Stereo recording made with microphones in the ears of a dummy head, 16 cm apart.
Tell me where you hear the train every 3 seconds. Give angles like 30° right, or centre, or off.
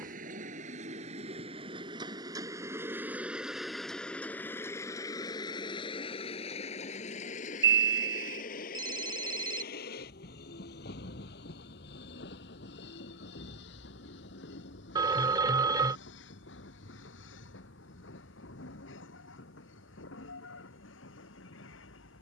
30° right, 10° left, 40° left, 50° left, 60° left, 70° left, 70° left, 70° left.